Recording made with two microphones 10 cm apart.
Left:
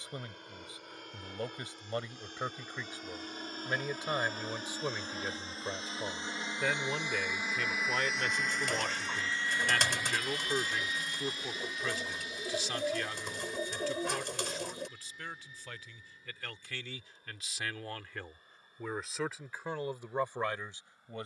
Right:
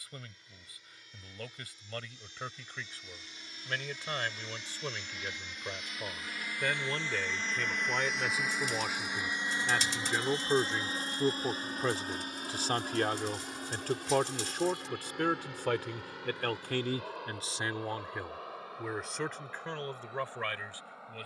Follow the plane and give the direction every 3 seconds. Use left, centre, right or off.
left, left, centre, right, right, right, right.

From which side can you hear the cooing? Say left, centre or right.
left.